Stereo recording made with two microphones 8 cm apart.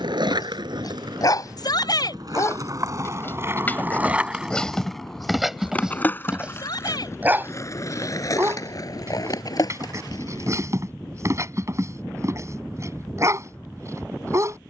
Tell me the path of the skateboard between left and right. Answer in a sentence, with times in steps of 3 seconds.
You can hear the skateboard on the right from 0 s, in the centre from 3 s, on the left from 6 s and not at all from 12 s.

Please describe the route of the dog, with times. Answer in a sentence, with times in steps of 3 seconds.
In this clip you hear the dog on the left from 0 s, in the centre from 3 s and on the right from 6 s.